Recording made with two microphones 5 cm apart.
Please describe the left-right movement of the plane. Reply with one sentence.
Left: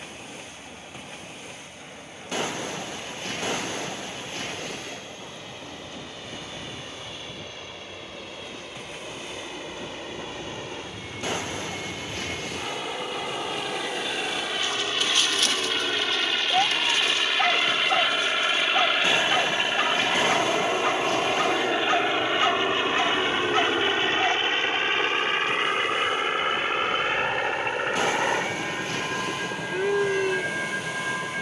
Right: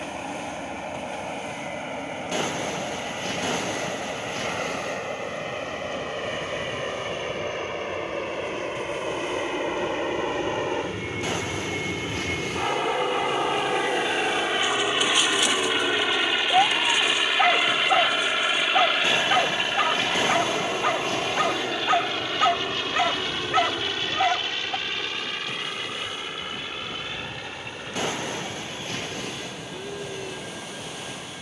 In this clip you hear the plane move to the left.